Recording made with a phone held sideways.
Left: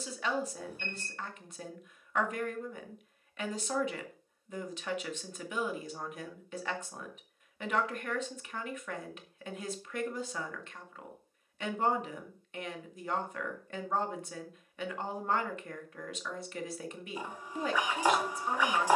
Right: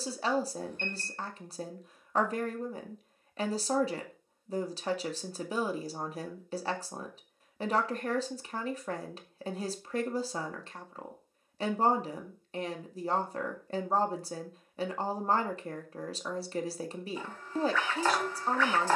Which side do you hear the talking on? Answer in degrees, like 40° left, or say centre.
30° right.